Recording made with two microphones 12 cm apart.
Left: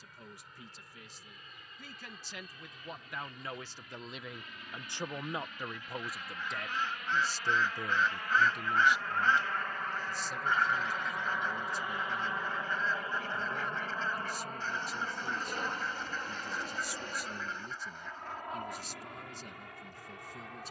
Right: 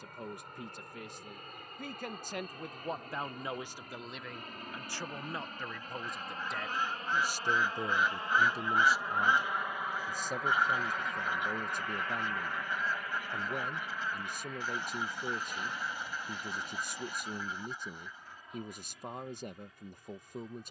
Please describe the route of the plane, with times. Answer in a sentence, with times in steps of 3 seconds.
You can hear the plane on the right from 0 s, in the centre from 9 s and on the left from 12 s.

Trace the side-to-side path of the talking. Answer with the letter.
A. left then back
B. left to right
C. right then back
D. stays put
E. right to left
A.